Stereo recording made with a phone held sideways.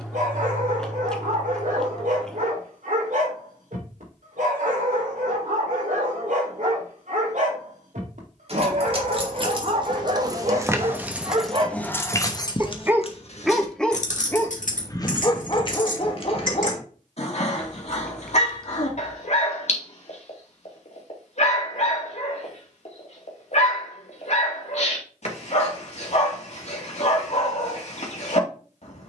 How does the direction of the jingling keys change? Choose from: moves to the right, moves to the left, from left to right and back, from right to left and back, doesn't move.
moves to the left.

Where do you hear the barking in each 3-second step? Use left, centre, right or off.
right, right, right, right, centre, left, left, left, left, left.